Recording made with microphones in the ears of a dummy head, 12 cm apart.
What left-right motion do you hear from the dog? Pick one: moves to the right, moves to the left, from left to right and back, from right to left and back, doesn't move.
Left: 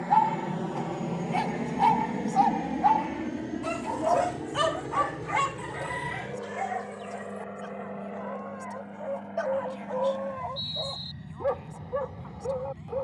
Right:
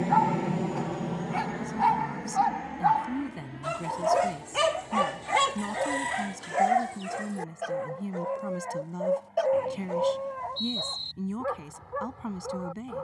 from left to right and back.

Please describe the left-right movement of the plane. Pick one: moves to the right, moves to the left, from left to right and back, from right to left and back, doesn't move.
moves to the left.